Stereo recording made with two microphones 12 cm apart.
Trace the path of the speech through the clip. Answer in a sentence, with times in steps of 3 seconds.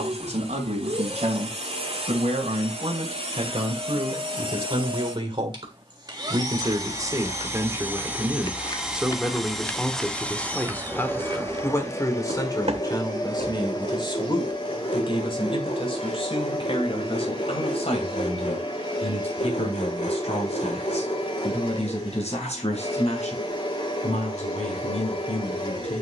In this clip you hear the speech on the right from 0 s, in the centre from 9 s and on the left from 12 s.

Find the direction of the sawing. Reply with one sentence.
In this clip you hear the sawing on the left.